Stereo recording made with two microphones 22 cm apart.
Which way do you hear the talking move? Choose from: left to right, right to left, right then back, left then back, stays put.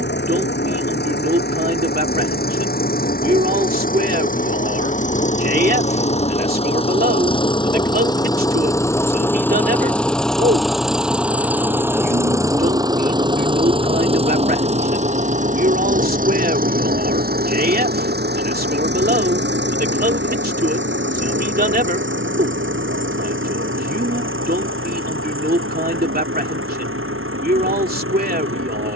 stays put.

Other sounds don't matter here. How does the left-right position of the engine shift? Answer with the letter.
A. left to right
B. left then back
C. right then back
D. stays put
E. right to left
A.